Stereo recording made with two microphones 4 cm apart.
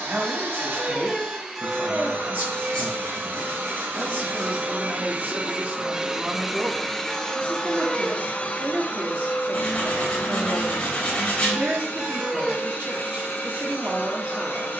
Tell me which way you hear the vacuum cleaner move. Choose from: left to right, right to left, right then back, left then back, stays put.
right to left.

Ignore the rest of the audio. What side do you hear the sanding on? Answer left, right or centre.
left.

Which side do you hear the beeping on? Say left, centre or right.
centre.